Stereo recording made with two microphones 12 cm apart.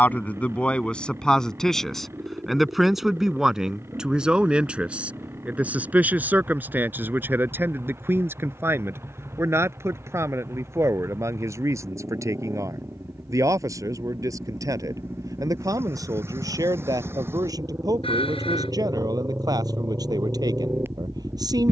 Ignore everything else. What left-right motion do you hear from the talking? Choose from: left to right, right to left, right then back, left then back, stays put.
left to right.